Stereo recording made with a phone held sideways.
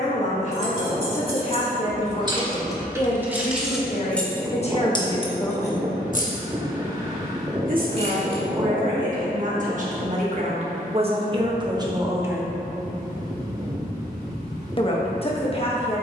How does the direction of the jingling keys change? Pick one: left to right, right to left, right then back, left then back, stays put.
right to left.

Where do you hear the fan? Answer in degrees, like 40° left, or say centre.
20° right.